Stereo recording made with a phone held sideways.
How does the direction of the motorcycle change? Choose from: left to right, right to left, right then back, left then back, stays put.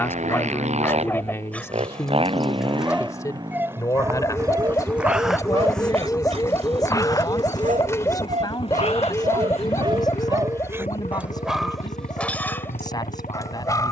right to left.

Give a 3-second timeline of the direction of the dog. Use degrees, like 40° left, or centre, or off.
10° left, 20° right, 50° right, 20° right, 20° left.